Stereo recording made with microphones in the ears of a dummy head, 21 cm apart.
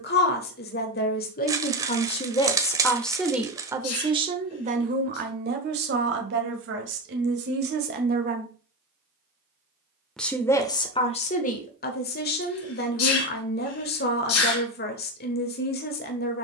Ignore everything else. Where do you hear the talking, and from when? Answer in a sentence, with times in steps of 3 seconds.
You can hear the talking on the left from 0 s, on the right from 3 s and on the left from 9 s.